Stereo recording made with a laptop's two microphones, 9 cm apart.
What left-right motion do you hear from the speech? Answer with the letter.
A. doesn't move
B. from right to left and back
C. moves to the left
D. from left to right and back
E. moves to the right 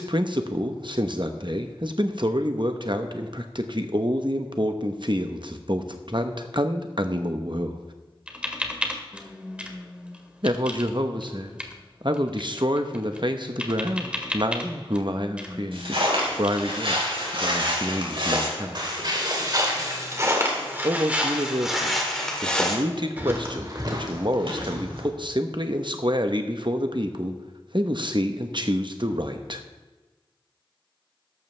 A.